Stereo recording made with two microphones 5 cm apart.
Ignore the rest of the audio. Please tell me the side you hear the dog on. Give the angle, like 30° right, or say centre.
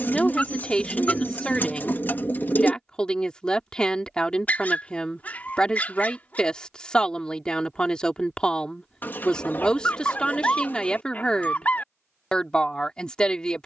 30° left.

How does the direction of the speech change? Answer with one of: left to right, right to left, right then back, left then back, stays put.
stays put.